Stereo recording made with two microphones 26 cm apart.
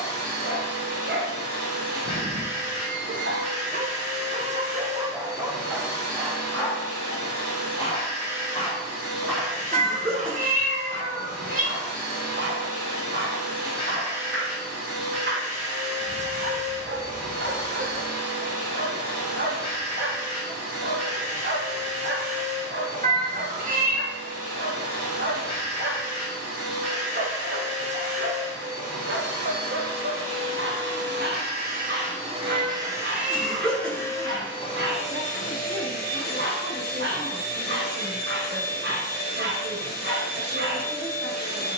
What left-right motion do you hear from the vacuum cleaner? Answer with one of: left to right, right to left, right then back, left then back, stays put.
right to left.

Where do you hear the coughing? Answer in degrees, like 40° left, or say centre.
centre.